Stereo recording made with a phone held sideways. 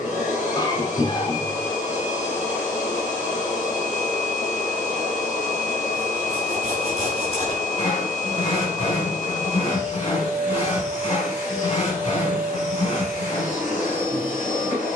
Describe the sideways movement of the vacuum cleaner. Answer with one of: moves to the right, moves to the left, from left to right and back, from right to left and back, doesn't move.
doesn't move.